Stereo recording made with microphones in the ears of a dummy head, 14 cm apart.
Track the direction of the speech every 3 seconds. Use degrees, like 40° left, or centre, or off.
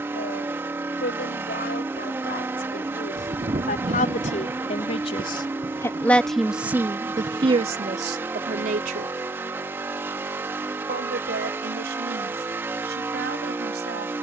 70° left, 40° left, 30° right, 70° right, 80° right.